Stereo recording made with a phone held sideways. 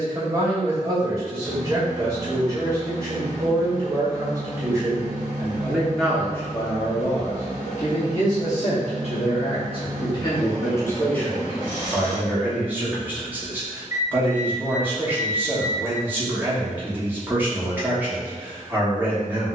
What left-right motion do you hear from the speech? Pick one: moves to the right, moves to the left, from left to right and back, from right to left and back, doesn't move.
from right to left and back.